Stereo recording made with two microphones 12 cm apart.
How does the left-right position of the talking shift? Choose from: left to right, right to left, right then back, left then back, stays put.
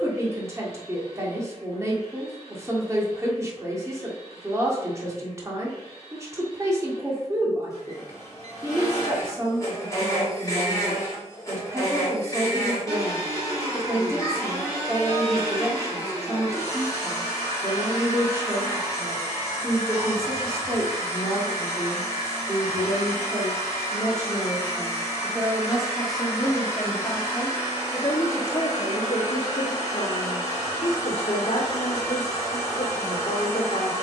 right to left.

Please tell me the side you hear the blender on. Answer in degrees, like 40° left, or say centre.
30° left.